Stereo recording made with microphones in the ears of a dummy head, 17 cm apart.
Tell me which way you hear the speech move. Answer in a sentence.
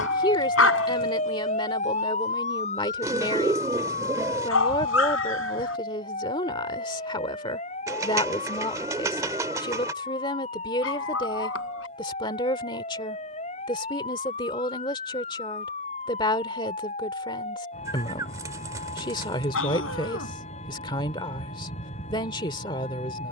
You can hear the speech stay put.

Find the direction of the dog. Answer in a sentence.
You can hear the dog on the left.